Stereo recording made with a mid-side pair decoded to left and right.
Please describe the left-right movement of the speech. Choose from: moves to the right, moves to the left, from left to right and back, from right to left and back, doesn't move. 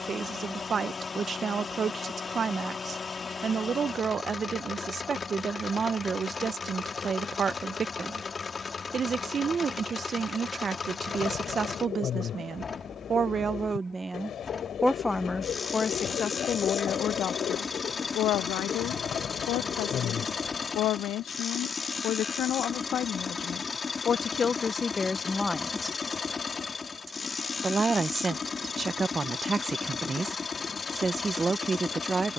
from right to left and back.